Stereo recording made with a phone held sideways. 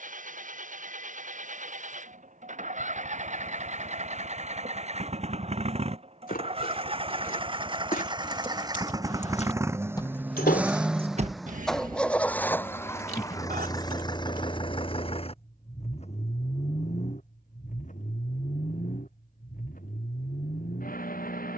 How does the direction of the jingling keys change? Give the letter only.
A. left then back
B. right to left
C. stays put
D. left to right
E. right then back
D.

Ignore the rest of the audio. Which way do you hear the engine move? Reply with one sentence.
You can hear the engine move from right to left.